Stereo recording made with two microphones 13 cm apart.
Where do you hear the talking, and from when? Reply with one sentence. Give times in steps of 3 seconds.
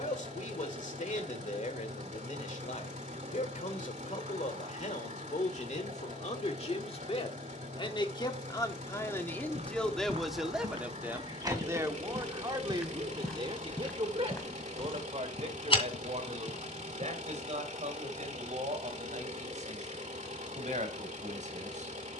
In this clip you hear the talking on the left from 0 s, in the centre from 9 s and on the right from 12 s.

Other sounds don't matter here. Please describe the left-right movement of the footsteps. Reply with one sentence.
In this clip you hear the footsteps move from right to left.